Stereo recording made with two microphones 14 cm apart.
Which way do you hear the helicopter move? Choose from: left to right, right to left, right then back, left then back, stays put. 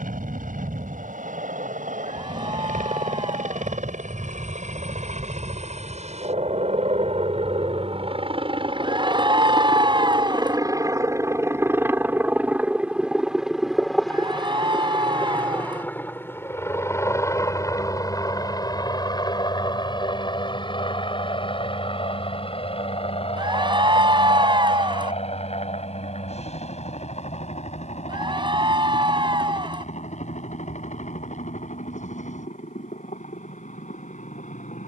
right to left.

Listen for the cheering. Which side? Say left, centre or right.
right.